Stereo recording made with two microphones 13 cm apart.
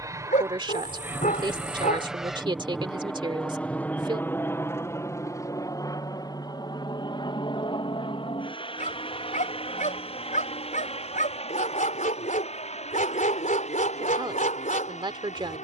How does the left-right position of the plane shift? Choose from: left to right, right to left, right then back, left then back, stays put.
right to left.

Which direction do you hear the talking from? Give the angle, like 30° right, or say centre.
40° right.